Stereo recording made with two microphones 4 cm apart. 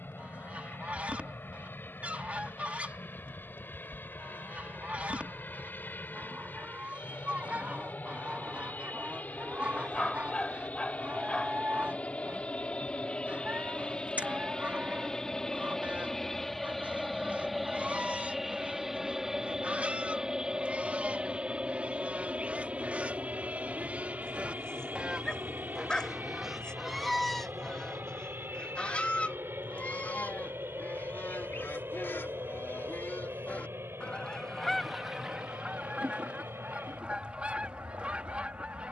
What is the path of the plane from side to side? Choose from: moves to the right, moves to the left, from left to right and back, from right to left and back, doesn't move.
moves to the right.